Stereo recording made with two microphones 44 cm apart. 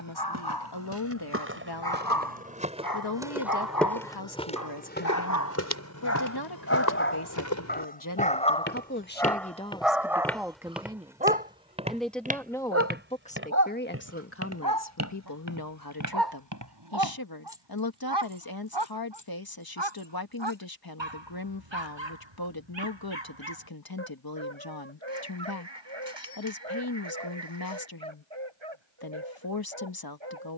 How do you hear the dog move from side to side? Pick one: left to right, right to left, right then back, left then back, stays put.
left to right.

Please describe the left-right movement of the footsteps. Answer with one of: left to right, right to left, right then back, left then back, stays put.
left then back.